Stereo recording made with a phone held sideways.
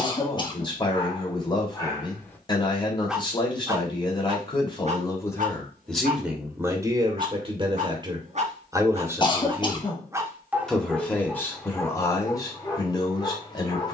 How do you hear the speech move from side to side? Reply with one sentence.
You can hear the speech move from left to right and back again.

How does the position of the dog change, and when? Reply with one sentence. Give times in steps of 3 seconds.
In this clip you hear the dog on the left from 0 s, on the right from 3 s, in the centre from 9 s and on the left from 12 s.